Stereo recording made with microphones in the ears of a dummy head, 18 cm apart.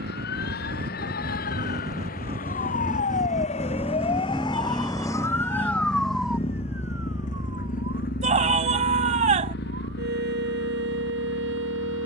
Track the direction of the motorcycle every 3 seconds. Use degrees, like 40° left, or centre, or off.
40° right, centre, 40° left, 60° left.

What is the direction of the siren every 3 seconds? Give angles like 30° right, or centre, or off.
50° left, 20° left, 20° right, 60° right.